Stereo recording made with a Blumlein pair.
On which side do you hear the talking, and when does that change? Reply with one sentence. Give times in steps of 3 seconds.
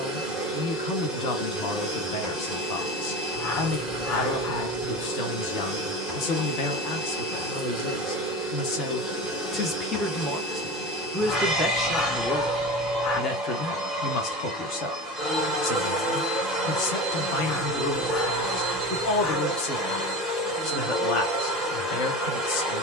In this clip you hear the talking on the left from 0 s, in the centre from 9 s and on the left from 12 s.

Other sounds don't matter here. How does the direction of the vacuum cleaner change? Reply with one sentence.
In this clip you hear the vacuum cleaner stay in one place.